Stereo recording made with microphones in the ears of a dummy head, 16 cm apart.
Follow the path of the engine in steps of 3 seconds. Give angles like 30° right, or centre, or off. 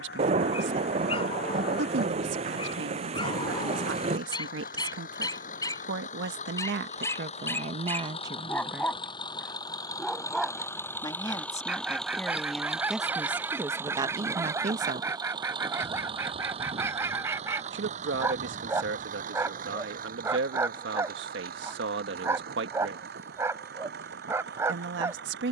60° left, 50° left, 40° left, 20° left, 10° right, 30° right, 50° right, 60° right, 60° right.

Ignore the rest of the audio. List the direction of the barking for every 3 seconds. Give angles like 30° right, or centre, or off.
30° left, 20° left, 10° left, centre, 10° right, 10° right, 10° right, 10° right, 10° right.